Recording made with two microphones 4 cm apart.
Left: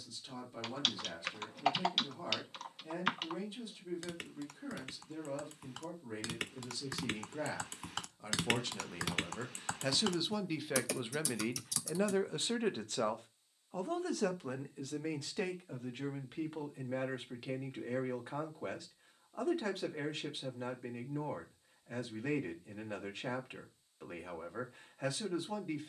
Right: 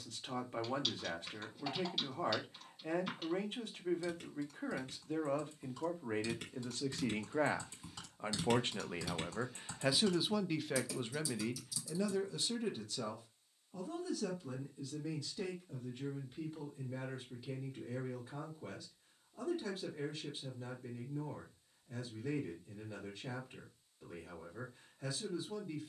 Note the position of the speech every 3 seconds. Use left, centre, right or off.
right, right, right, centre, left, left, left, left, left.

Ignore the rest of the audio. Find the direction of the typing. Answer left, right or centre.
left.